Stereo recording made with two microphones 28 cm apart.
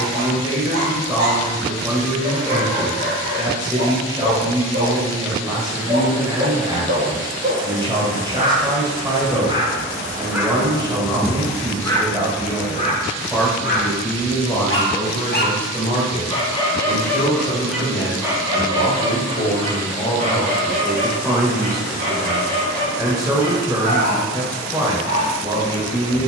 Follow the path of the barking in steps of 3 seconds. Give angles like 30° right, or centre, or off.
40° right, 40° right, 30° right, 10° right, 30° left, 10° left, 20° right, 40° right, 40° right.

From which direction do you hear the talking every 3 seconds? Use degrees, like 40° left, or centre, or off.
20° right, 20° right, 20° right, 20° right, centre, 30° left, 30° left, 10° right, 10° right.